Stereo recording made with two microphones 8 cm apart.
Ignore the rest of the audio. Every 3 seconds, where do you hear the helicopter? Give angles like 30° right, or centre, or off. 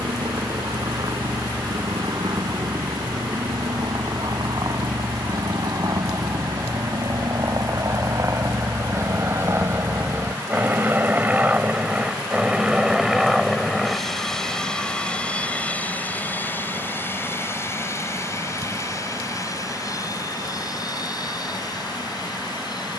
60° right, 50° right, 40° right, 20° right, centre, 20° left, 40° left, 50° left.